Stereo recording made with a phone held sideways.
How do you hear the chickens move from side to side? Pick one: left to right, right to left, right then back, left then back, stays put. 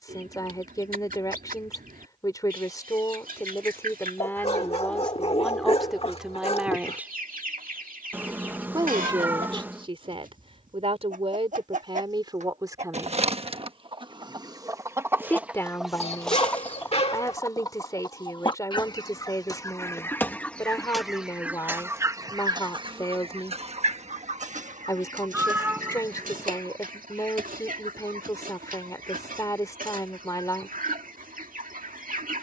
left then back.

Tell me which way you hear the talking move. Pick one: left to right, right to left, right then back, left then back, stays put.
right then back.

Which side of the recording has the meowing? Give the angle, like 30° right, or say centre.
10° right.